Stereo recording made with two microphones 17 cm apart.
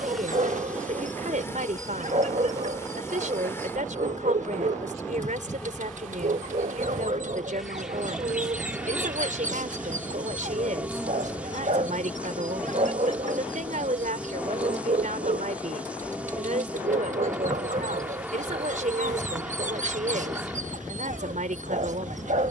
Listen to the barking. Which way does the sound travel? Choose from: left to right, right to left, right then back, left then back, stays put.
stays put.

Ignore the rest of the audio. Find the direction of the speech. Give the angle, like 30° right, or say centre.
50° right.